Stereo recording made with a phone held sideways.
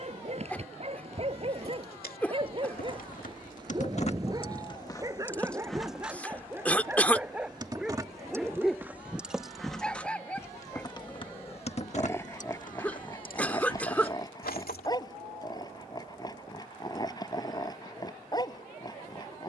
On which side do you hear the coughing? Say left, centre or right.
centre.